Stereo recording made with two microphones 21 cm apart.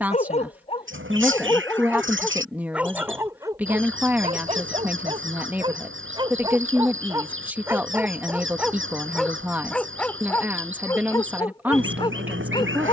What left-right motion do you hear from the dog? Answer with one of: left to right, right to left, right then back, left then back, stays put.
right then back.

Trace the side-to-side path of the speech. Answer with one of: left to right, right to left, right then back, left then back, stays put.
stays put.